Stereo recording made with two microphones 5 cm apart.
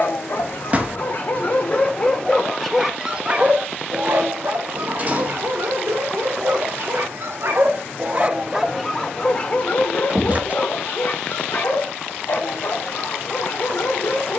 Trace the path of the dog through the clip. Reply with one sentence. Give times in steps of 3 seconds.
In this clip you hear the dog on the left from 0 s, on the right from 3 s and on the left from 9 s.